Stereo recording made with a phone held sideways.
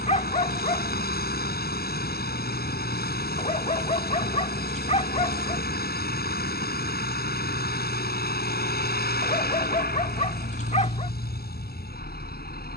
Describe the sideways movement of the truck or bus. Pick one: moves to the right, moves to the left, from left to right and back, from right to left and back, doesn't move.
doesn't move.